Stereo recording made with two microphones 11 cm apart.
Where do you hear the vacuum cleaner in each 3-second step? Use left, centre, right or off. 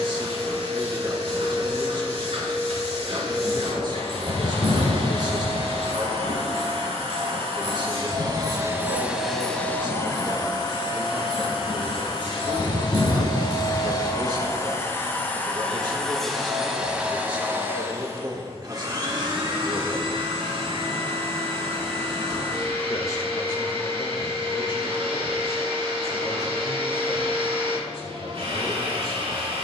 right, right, right, left, left, centre, right, right, right, right.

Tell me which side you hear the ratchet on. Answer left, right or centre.
left.